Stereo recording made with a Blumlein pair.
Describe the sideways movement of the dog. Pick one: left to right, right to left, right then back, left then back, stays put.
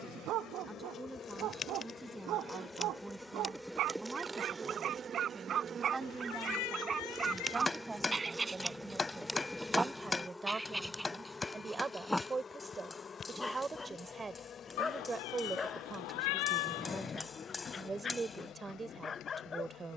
right to left.